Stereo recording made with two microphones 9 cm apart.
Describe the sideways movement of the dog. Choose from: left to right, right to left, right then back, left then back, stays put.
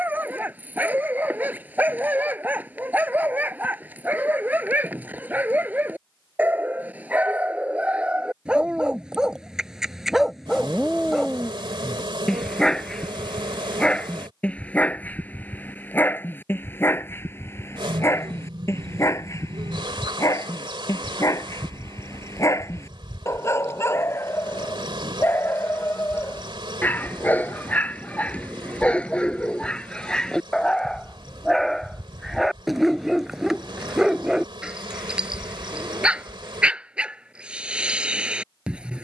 left then back.